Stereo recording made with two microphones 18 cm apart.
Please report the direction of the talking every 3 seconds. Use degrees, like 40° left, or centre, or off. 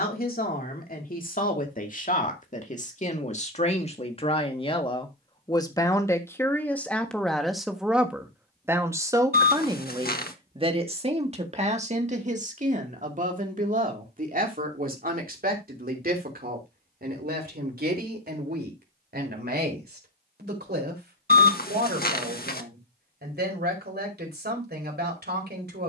50° left, 30° left, centre, 30° right, 50° right, 60° right, 70° right, 70° right, 70° right.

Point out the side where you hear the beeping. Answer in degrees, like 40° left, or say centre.
60° left.